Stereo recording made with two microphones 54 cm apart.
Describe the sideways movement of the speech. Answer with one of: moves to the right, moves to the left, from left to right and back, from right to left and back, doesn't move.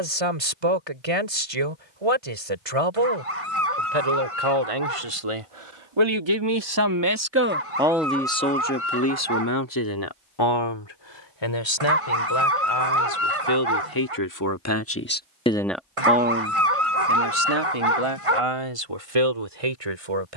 from right to left and back.